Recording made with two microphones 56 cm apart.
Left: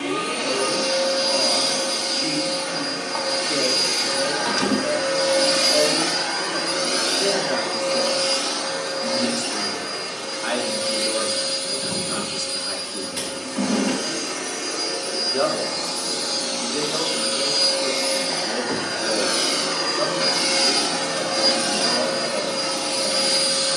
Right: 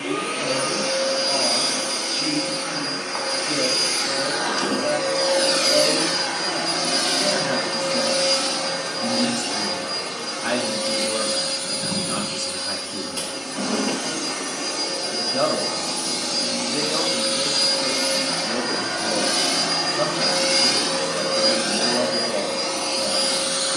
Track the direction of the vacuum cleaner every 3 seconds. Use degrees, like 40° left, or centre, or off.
60° left, 40° left, 30° right, 60° right, 60° right, 50° right, 20° right, 30° left.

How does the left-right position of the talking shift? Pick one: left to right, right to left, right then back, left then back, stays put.
stays put.